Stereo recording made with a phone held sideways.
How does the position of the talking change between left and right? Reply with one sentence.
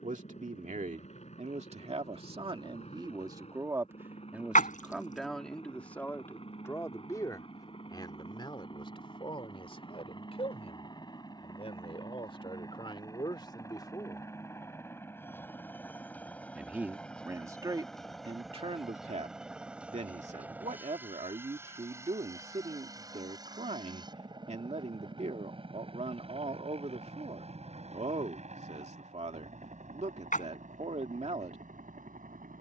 In this clip you hear the talking move from right to left and back again.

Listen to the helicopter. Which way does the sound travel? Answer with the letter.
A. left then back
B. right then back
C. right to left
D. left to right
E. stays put
D.